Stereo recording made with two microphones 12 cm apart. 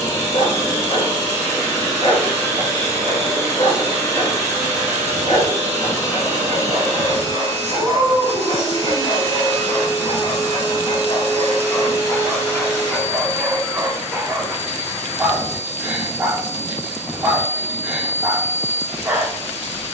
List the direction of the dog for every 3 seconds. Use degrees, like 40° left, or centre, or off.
60° left, 60° left, 60° left, 40° left, centre, 10° right, 10° right.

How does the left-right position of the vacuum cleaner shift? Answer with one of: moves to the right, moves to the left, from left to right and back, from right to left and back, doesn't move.
doesn't move.